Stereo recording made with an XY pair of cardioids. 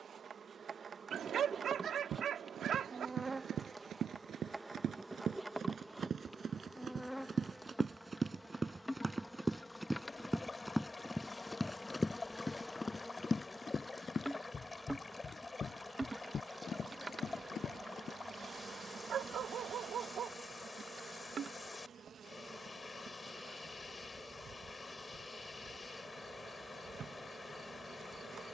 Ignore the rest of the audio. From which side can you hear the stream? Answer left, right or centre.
left.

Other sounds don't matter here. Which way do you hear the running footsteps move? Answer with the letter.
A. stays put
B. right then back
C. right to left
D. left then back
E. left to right
C.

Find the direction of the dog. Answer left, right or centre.
right.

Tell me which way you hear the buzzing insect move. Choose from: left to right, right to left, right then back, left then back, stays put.
left then back.